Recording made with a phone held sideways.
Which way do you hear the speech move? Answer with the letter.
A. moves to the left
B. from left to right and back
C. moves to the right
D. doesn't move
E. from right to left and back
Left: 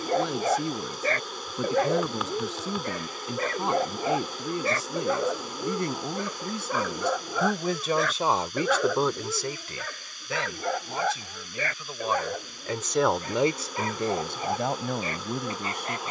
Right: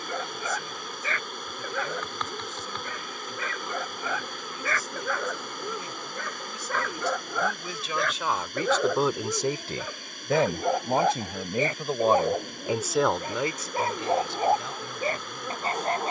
B.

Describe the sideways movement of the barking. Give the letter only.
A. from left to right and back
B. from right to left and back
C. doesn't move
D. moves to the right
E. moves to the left
D.